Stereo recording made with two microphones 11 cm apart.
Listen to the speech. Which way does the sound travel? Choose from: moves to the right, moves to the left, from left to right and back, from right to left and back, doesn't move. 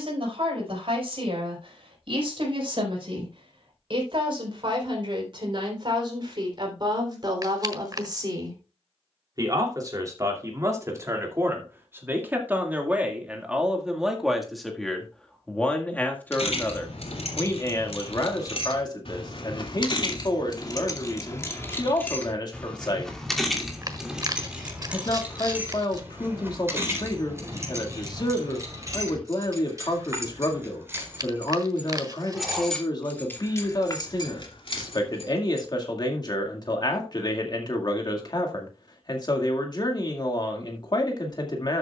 moves to the left.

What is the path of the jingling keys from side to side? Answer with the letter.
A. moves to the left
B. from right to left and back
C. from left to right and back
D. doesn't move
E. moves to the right
C.